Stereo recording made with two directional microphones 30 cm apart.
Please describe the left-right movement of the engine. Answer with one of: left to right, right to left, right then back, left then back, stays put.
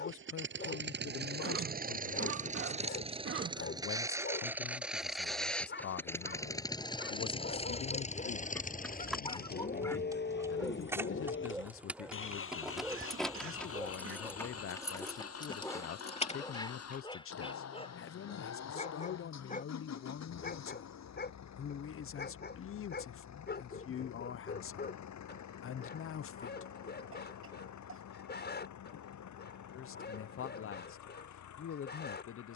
right to left.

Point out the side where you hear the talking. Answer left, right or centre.
left.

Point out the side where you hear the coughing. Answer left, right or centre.
right.